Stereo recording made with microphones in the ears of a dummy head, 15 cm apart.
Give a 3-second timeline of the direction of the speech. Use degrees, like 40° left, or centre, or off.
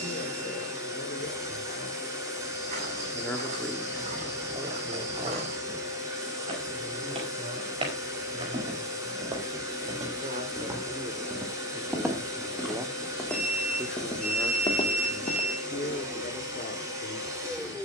50° left, 10° right, 50° right, 40° right, centre, 40° left.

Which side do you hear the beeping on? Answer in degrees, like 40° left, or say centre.
40° right.